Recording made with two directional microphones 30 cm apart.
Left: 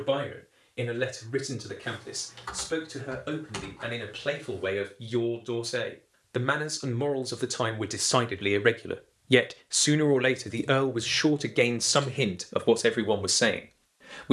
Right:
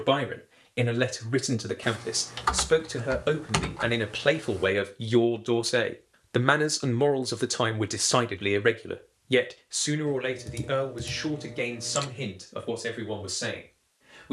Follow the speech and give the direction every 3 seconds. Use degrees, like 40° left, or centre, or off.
60° right, 50° right, 10° right, 40° left, 60° left.